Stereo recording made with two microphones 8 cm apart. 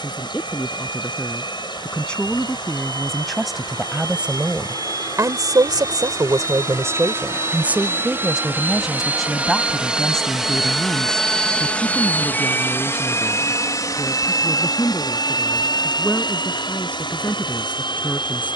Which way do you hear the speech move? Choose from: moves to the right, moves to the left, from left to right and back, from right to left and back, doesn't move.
from left to right and back.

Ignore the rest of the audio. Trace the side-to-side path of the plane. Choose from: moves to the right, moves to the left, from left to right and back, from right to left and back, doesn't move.
moves to the left.